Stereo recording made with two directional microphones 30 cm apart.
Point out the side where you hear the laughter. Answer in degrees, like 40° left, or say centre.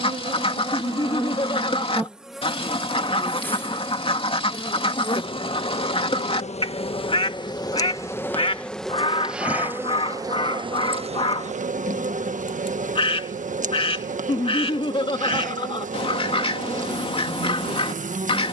20° left.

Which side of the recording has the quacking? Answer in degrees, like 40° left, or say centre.
20° left.